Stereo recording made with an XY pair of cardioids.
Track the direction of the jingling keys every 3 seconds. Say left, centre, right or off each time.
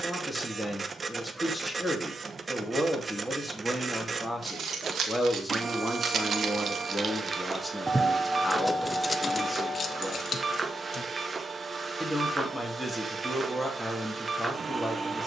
off, right, right, left, off.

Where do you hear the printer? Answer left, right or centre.
right.